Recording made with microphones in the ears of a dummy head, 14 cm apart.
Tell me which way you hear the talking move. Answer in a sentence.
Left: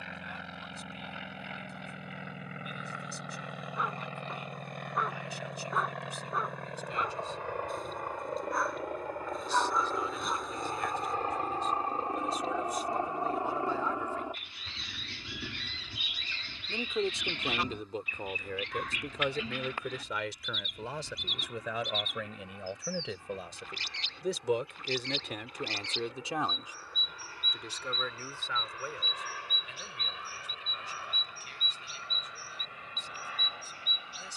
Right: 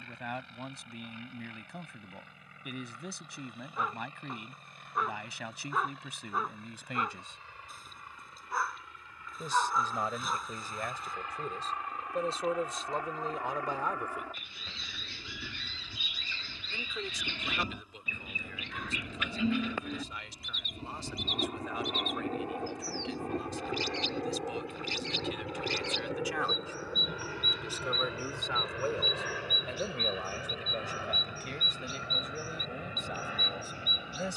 In this clip you hear the talking move from right to left and back again.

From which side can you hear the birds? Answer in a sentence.
In this clip you hear the birds on the right.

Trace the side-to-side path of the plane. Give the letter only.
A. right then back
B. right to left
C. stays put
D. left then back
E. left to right
E.